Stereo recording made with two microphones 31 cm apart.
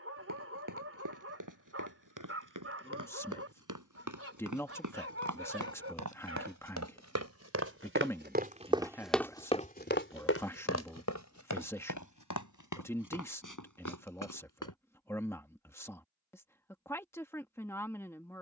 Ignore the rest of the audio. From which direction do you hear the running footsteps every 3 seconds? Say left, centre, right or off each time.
right, right, right, left, left, off.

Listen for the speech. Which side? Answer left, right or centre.
centre.